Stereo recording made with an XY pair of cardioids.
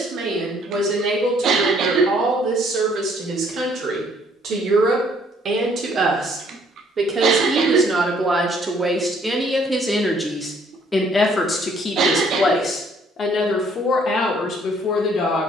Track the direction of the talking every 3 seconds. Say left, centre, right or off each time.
right, right, right, centre, left.